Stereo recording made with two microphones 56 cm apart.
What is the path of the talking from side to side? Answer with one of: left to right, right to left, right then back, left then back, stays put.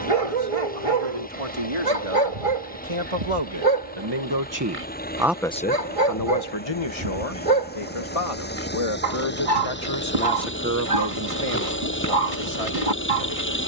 left then back.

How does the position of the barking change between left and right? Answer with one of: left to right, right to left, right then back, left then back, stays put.
stays put.